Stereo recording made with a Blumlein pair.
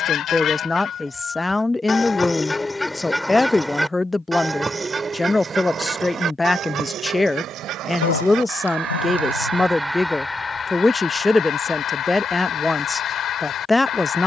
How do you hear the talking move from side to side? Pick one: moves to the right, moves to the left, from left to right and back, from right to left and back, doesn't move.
doesn't move.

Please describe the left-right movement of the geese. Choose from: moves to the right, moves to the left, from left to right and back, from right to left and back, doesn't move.
from left to right and back.